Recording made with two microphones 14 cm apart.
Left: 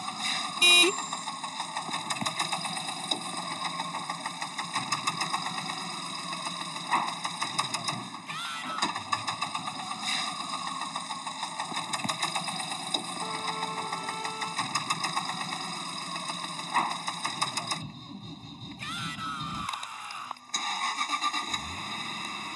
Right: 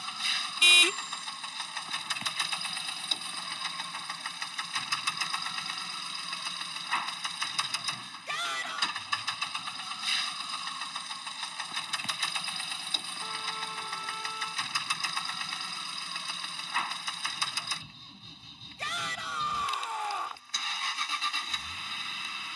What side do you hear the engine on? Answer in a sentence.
In this clip you hear the engine on the left.